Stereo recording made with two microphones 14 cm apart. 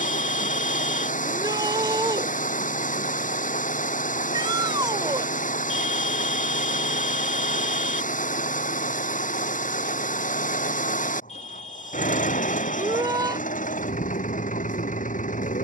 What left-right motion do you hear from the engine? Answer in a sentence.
In this clip you hear the engine stay in one place.